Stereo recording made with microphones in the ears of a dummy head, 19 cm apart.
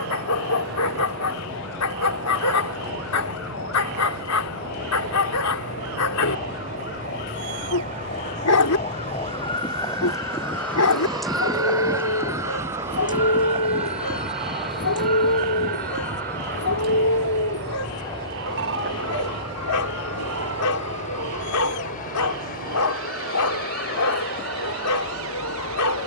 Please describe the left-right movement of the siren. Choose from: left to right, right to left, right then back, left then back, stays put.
left to right.